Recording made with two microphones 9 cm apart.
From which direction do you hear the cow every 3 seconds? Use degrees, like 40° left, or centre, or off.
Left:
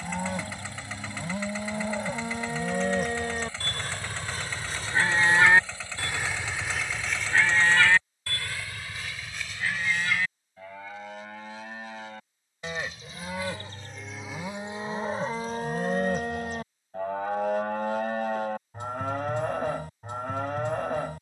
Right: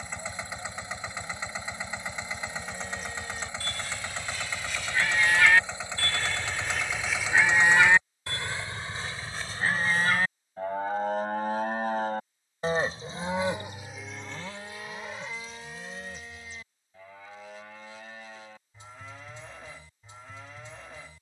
70° left, 40° left, 10° right, 40° right, 10° right, 60° left, 60° left.